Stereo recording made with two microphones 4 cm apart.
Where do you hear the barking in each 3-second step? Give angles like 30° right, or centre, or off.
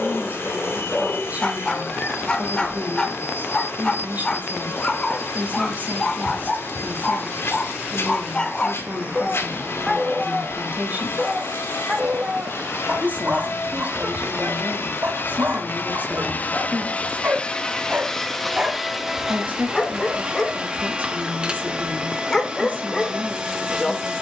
20° left, 20° left, 20° left, 10° right, 40° right, 50° right, centre, 10° left.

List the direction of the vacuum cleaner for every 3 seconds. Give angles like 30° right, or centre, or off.
80° left, 80° left, 80° left, 80° left, 70° left, 40° left, 10° right, 20° right.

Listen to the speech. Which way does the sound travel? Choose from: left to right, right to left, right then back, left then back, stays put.
stays put.